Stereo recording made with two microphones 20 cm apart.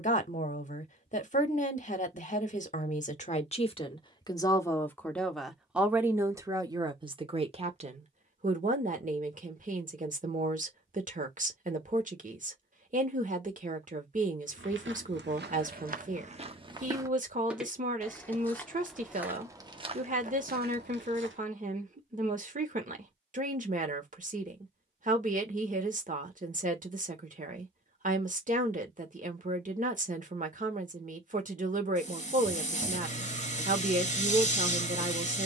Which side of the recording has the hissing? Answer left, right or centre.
left.